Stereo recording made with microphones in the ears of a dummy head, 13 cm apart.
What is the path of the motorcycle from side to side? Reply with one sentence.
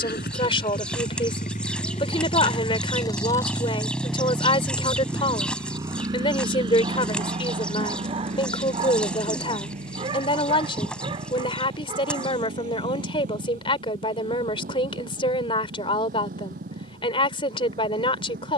In this clip you hear the motorcycle go from the left side to the right.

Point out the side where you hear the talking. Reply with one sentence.
You can hear the talking on the left.